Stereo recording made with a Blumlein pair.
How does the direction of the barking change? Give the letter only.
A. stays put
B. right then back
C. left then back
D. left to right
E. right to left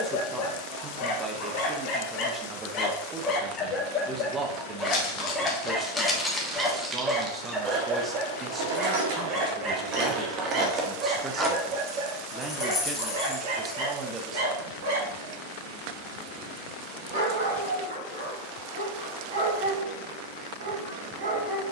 D.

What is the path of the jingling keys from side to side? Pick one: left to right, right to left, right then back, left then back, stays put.
right then back.